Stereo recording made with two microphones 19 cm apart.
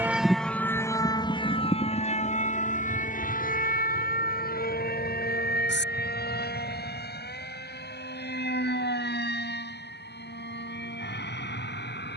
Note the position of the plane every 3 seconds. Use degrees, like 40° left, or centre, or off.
20° left, 50° left, 50° left, 60° left.